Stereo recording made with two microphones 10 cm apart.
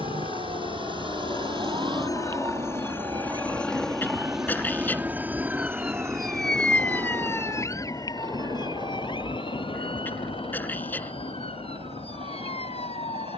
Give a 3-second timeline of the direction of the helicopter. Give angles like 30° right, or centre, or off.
40° left, 10° right, 40° right, 50° right, 60° right.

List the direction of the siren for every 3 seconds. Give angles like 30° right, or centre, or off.
50° right, 30° right, 30° left, 60° left, 70° left.